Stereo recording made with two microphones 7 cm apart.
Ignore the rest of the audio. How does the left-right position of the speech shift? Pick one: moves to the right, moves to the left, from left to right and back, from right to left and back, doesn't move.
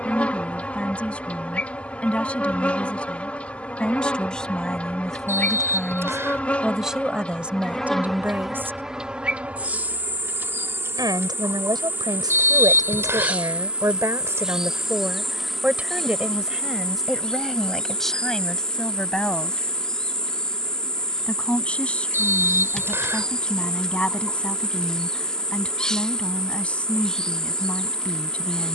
from left to right and back.